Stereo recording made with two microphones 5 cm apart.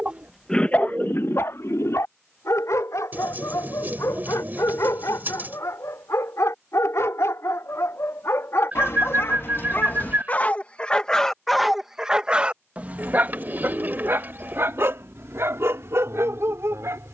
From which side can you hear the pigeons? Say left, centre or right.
right.